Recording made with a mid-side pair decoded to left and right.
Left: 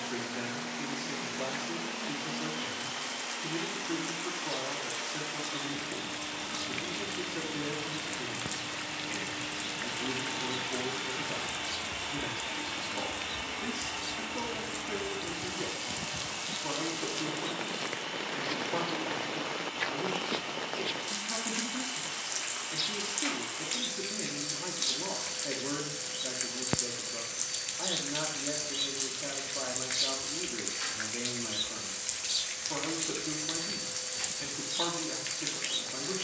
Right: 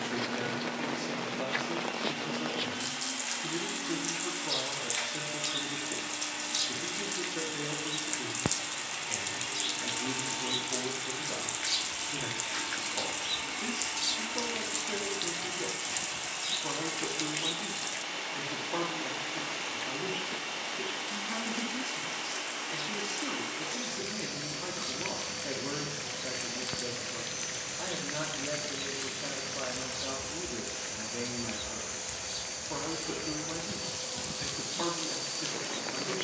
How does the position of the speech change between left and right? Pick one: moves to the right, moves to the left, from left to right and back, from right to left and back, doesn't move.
doesn't move.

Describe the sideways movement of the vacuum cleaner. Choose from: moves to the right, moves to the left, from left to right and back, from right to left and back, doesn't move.
from right to left and back.